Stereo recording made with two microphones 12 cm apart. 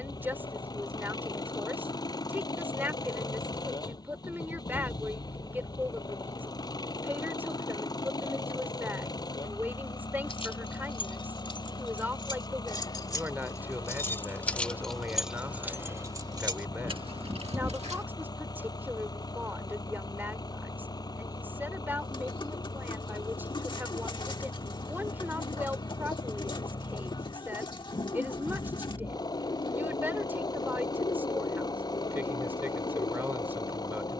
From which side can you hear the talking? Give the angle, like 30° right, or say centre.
20° right.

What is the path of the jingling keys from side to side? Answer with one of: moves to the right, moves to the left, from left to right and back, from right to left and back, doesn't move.
moves to the right.